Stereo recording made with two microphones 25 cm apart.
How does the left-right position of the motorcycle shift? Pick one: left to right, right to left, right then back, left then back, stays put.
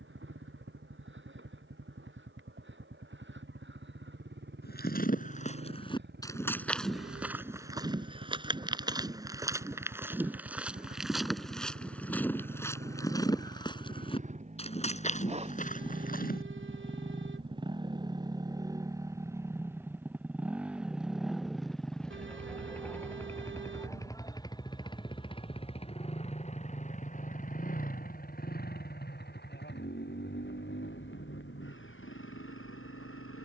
right to left.